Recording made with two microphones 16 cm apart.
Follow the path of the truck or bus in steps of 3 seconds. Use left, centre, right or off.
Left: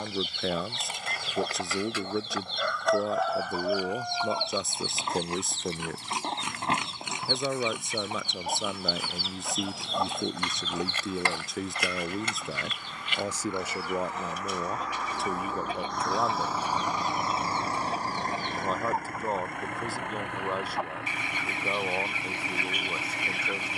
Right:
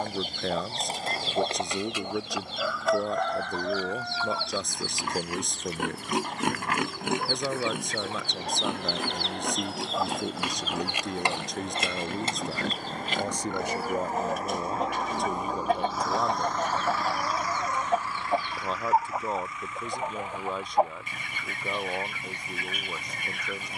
right, right, right, right, right, centre, left, left.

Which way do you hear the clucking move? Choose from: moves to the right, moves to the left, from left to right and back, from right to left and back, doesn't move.
from right to left and back.